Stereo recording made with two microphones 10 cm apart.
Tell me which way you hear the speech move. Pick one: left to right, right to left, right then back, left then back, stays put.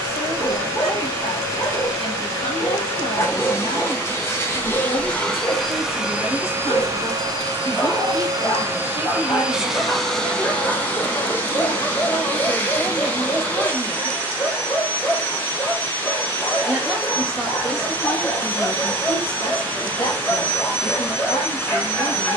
right then back.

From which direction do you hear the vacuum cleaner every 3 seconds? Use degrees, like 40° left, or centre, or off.
30° left, 20° left, 30° right, 10° left, 20° left, 20° left, 20° left, 20° left.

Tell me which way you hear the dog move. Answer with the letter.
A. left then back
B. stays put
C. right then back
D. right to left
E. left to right
B.